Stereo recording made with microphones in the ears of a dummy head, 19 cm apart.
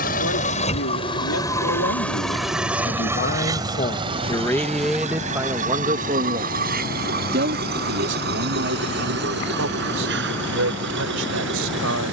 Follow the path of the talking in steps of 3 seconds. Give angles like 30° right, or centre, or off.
70° left, 10° left, 50° right, 60° right.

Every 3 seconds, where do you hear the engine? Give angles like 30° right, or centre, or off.
20° left, 30° right, 40° right, 50° right.